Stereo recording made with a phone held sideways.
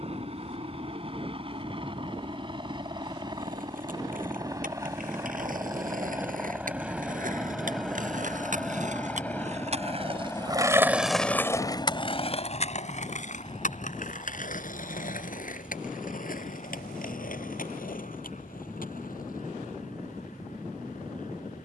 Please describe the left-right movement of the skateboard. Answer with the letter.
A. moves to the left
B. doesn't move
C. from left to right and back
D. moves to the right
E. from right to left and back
A.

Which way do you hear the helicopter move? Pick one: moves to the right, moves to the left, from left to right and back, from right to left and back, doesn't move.
moves to the left.